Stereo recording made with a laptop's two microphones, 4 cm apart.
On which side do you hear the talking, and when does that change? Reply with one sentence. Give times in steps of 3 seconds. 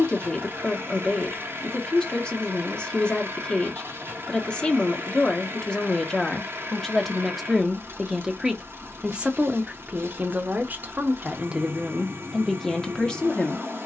In this clip you hear the talking on the left from 0 s, in the centre from 6 s, on the right from 9 s and in the centre from 12 s.